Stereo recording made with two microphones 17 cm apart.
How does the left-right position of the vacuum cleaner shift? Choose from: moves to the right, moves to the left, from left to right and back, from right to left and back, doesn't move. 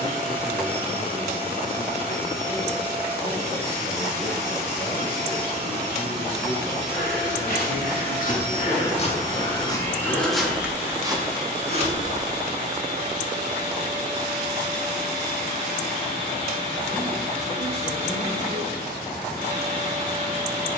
doesn't move.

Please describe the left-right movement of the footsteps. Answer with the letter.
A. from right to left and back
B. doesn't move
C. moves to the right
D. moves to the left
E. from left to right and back
C.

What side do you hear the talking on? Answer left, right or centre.
left.